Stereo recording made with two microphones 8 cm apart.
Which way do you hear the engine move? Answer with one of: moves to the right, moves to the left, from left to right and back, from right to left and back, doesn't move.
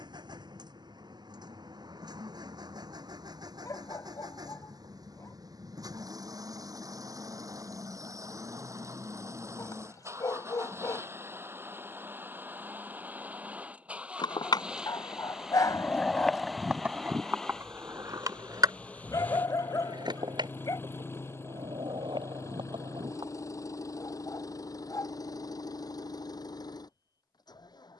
moves to the left.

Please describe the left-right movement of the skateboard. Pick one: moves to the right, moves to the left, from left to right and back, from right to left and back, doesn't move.
moves to the right.